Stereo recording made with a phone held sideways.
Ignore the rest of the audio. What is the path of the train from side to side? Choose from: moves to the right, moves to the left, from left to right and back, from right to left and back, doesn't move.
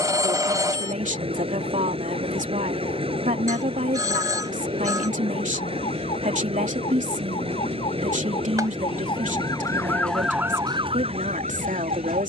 doesn't move.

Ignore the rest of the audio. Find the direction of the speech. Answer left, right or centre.
right.